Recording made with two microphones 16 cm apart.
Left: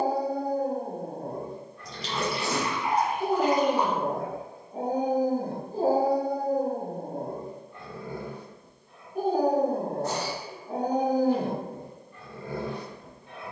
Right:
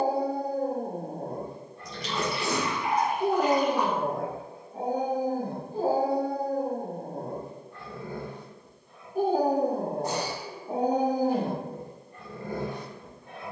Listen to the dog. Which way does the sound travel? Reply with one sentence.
You can hear the dog move from right to left and back again.